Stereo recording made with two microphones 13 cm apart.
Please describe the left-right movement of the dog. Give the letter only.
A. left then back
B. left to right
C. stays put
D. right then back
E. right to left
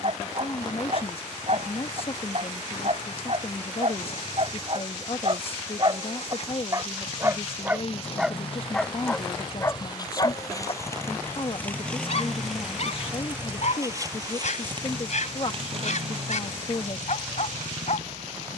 E.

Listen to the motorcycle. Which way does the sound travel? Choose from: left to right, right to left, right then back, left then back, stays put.
left to right.